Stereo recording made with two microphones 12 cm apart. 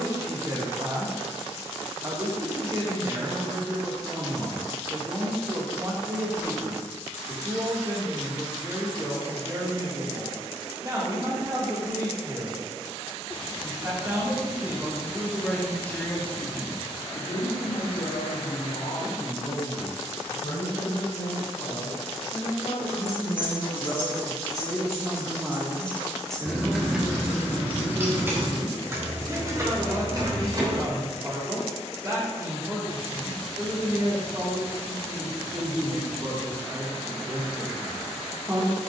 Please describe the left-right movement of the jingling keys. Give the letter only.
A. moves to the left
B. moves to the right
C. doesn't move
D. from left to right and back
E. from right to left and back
B.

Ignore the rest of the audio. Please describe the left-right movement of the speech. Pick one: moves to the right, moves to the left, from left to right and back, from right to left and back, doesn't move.
from right to left and back.